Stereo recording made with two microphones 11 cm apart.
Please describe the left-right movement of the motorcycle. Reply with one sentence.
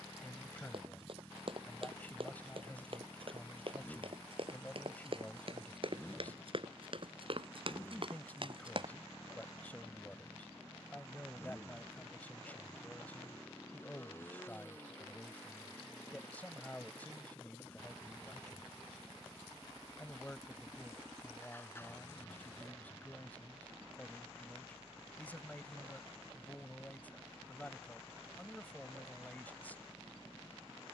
In this clip you hear the motorcycle stay in one place.